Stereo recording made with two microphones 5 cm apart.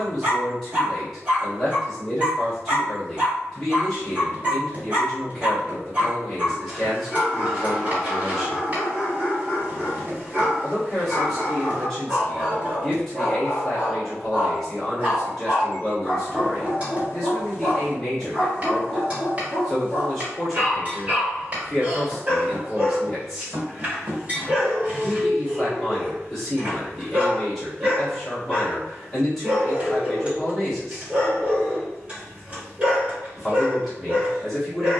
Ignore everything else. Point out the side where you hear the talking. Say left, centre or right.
centre.